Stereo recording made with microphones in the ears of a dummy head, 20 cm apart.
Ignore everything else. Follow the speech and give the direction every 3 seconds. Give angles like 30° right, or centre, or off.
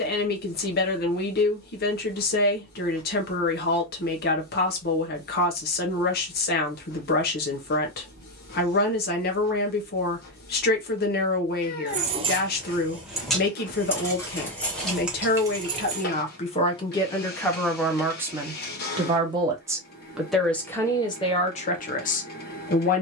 40° left, 40° left, 40° left, 40° left, 40° left, 30° left, 10° right, 30° left.